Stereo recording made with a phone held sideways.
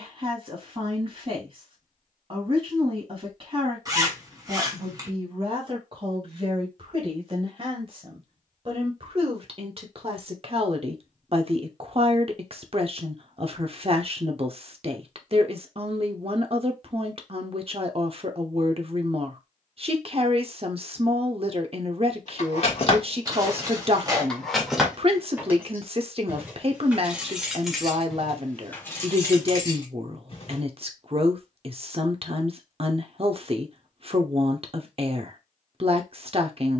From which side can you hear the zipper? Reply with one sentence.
You can hear the zipper on the right.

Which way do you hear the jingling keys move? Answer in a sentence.
You can hear the jingling keys move from left to right and back again.